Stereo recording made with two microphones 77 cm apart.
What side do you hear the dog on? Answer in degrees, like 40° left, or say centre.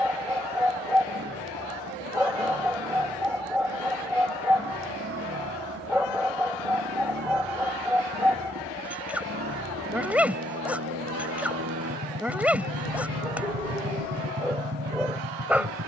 centre.